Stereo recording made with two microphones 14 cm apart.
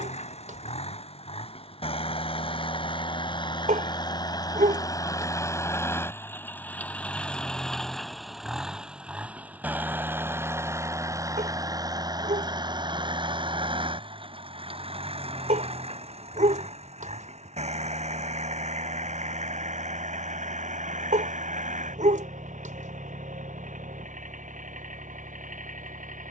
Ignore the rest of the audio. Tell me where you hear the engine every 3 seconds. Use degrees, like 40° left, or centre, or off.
40° left, 30° left, 10° left, 20° right, 40° right, 50° right, 60° right, 60° right, 60° right.